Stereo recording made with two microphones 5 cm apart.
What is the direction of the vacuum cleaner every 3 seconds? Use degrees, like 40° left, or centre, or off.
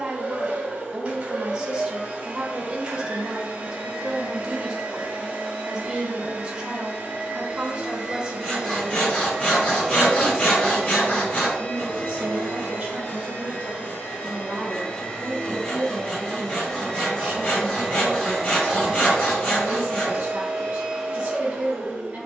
30° right, 30° right, 20° right, 10° left, 30° left, 10° left, 10° right, 20° right.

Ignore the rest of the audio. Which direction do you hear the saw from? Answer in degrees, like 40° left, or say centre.
30° left.